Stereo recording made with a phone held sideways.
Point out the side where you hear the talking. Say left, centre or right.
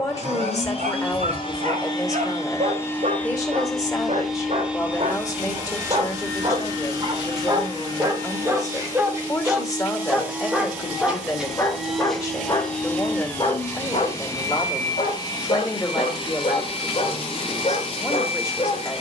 left.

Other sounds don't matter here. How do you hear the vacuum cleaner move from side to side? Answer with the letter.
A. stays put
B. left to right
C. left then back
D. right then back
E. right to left
D.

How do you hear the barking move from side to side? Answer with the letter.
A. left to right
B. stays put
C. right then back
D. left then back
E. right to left
E.